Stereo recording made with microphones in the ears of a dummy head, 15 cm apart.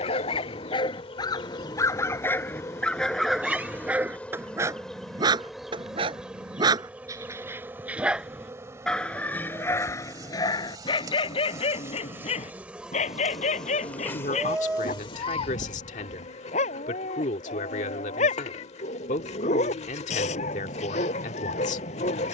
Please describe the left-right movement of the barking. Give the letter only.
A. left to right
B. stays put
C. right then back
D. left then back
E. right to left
C.